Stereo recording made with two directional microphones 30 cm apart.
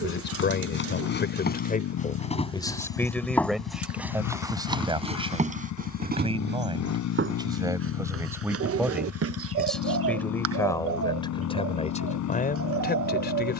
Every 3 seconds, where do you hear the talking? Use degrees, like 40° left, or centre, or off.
30° left, 10° right, 10° right, 10° left, 30° left.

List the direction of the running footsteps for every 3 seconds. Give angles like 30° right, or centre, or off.
30° left, 10° right, 40° right, 50° right, off.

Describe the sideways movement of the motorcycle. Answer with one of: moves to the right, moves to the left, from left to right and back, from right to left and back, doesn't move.
doesn't move.